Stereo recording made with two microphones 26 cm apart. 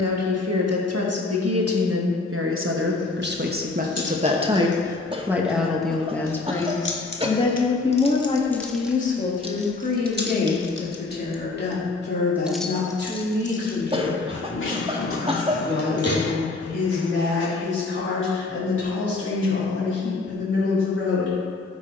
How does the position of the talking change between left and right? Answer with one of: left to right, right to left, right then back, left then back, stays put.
right to left.